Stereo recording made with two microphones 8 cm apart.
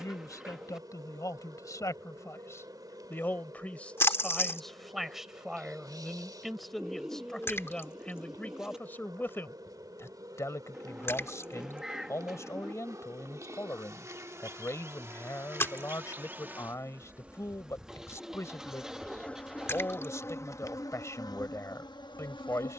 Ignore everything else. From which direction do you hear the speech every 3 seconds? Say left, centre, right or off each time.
left, centre, centre, left, left, left, left, left.